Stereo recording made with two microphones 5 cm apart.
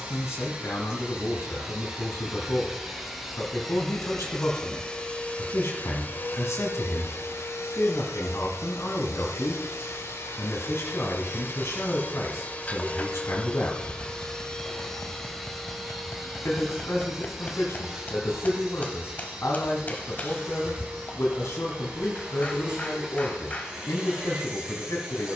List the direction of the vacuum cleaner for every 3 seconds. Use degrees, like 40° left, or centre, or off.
10° right, 10° left, 60° left, 60° left, 20° left, centre, 20° right, 20° right, 20° right.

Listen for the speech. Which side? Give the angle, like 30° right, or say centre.
80° left.